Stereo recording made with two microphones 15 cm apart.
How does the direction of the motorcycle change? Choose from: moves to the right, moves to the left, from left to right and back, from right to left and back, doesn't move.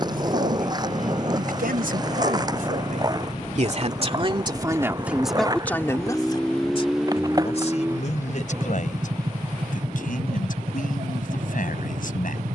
moves to the right.